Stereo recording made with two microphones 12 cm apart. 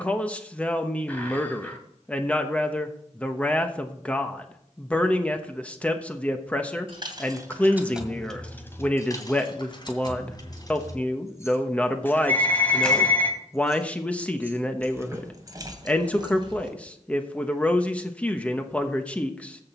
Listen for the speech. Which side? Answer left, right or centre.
centre.